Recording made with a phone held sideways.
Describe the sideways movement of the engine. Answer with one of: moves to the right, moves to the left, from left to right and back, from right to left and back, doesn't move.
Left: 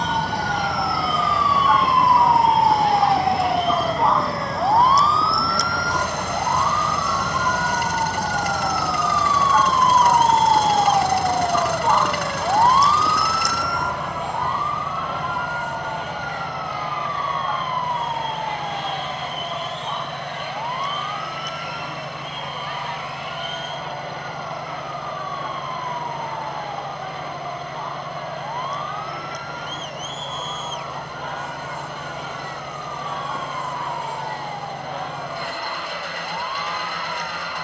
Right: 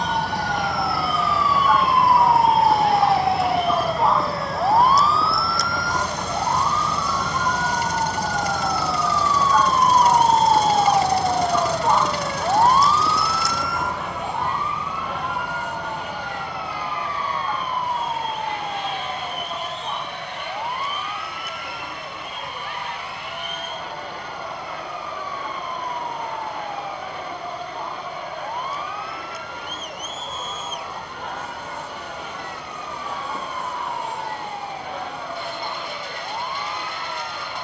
doesn't move.